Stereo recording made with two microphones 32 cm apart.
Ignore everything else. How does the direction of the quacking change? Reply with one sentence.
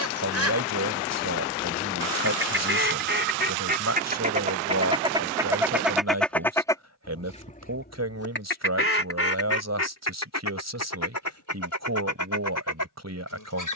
You can hear the quacking travel towards the left.